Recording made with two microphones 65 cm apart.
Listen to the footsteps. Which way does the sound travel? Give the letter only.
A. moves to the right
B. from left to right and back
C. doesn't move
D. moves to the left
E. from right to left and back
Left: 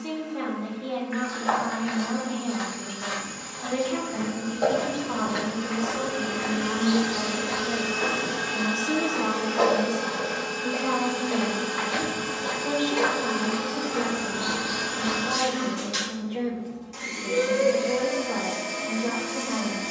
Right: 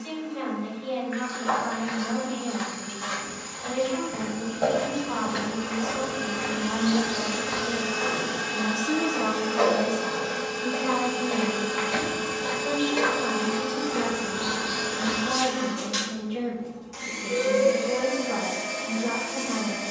B.